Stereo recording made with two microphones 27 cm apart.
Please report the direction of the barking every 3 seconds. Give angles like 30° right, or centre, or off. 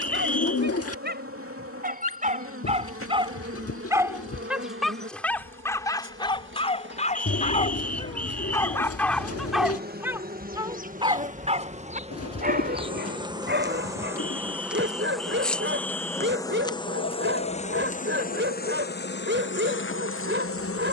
30° right, centre, 20° left, 10° right, 40° right, 40° right, 40° right.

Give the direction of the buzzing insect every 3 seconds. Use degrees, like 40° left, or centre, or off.
50° right, 50° right, 40° right, 30° right, 10° right, 10° left, 40° left.